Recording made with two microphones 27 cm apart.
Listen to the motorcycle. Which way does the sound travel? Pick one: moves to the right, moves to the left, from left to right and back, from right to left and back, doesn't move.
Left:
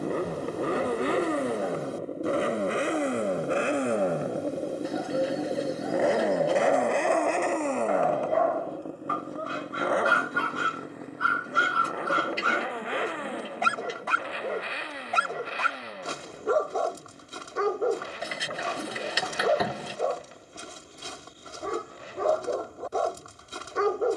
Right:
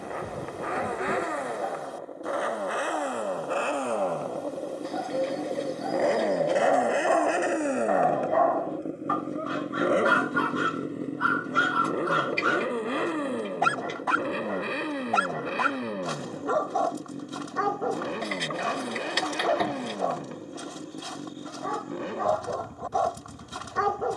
moves to the right.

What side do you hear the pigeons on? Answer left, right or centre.
centre.